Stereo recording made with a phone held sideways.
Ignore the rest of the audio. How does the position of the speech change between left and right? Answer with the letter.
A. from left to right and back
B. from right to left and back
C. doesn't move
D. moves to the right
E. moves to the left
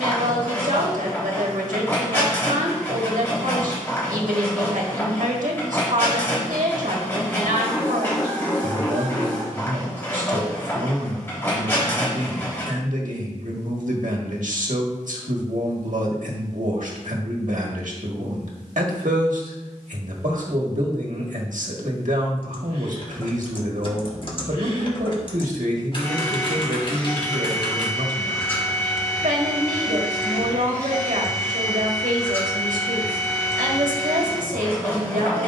C.